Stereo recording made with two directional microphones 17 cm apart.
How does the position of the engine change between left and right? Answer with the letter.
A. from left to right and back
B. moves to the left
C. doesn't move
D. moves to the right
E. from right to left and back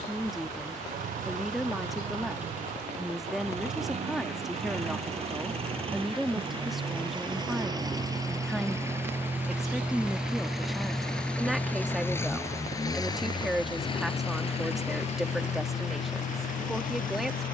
B.